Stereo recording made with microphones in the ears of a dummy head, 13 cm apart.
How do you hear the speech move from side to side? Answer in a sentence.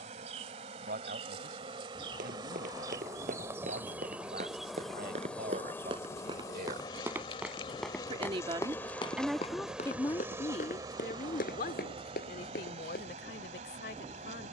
You can hear the speech move to the left.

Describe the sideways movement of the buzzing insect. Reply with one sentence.
You can hear the buzzing insect go left and come back.